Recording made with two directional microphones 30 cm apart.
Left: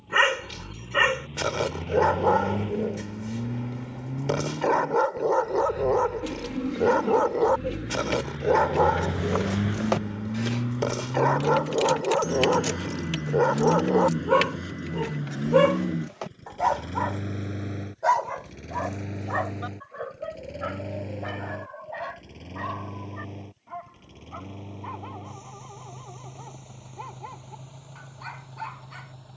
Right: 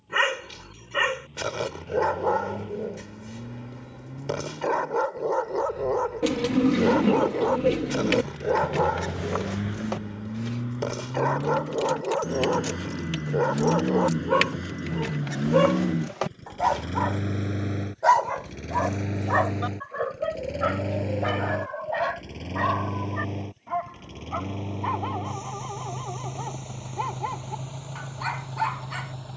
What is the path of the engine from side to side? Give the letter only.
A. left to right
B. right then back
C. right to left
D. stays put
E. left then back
A.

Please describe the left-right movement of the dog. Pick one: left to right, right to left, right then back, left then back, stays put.
left to right.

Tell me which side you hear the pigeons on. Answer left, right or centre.
right.